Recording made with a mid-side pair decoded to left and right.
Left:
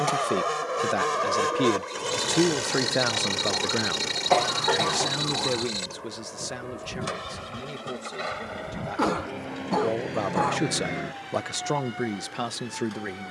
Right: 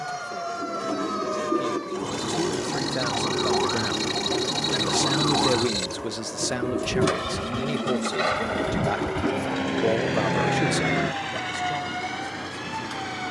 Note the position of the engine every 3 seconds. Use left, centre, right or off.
left, centre, right, right, right.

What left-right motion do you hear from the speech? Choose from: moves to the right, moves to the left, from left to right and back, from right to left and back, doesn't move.
from left to right and back.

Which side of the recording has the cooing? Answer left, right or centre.
right.